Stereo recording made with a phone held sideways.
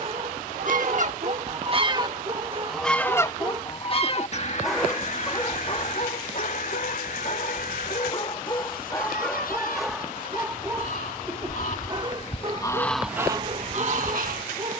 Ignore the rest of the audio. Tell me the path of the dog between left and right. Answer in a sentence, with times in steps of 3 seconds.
In this clip you hear the dog on the right from 0 s, in the centre from 3 s, on the left from 6 s, in the centre from 9 s and on the right from 12 s.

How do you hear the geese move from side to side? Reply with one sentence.
In this clip you hear the geese move from right to left and back again.